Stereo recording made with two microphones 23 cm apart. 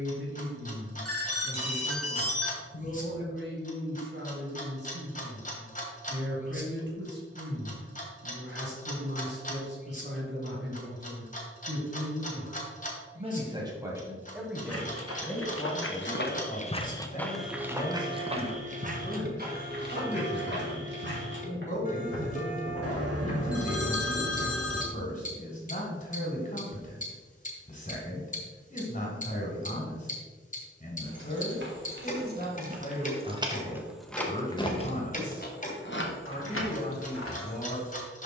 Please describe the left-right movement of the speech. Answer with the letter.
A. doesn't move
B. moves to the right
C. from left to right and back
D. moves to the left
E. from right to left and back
D.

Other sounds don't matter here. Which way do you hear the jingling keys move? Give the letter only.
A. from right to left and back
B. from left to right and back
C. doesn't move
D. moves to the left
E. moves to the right
D.